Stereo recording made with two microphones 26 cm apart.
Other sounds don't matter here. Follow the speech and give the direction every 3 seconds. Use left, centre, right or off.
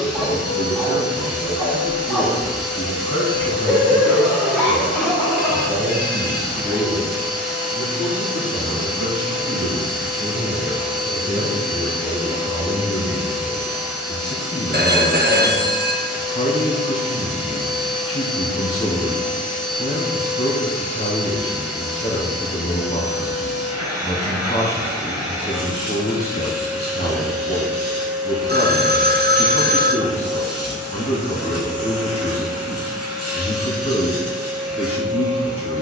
left, centre, right, right, centre, left, left, left, left, left, left, left.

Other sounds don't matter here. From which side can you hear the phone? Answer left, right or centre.
right.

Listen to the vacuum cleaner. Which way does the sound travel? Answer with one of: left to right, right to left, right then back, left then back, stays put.
stays put.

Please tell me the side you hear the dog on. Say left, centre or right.
centre.